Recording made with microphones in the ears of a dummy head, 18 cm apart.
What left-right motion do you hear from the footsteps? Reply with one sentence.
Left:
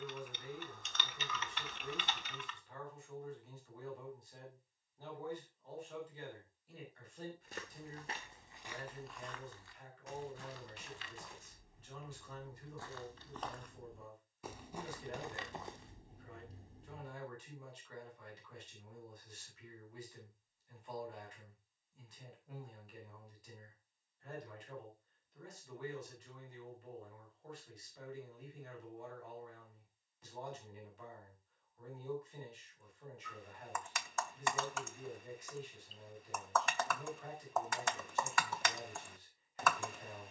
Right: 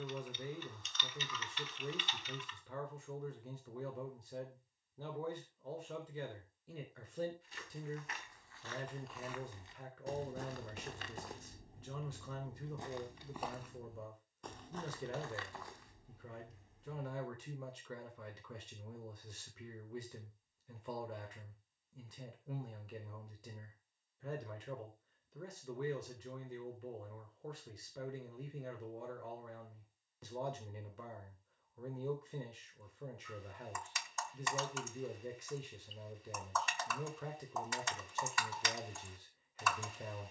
In this clip you hear the footsteps move from left to right and back again.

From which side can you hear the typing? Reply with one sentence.
You can hear the typing on the left.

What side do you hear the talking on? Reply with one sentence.
In this clip you hear the talking on the right.